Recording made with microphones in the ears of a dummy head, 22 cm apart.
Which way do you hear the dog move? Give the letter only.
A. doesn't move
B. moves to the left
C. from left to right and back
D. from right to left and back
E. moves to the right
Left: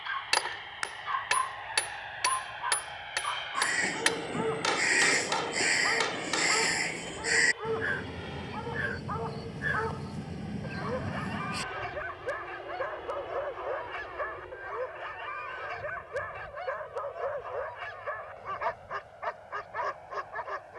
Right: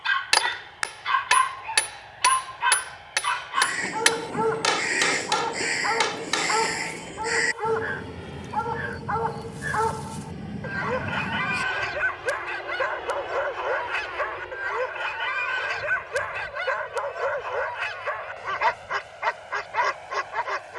A.